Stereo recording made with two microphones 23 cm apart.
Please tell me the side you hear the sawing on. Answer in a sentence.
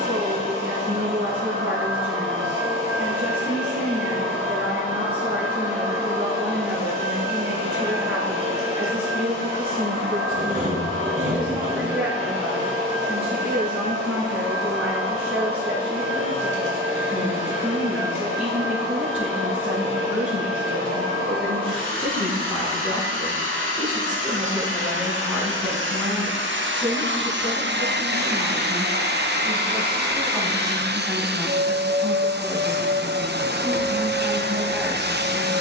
In this clip you hear the sawing on the right.